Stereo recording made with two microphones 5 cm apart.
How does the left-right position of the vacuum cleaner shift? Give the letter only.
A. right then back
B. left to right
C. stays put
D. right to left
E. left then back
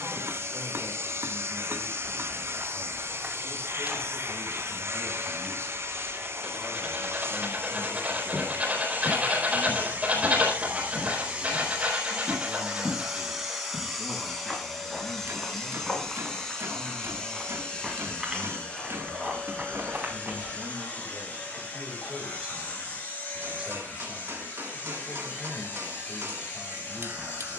D.